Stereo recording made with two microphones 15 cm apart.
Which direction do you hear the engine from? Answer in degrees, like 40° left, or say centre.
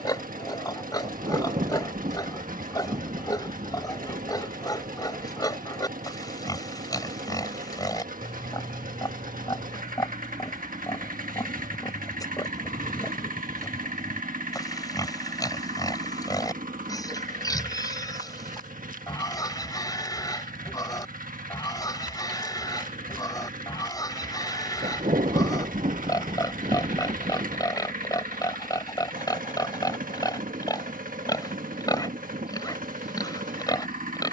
60° right.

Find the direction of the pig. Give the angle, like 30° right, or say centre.
20° left.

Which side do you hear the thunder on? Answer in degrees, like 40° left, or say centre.
50° right.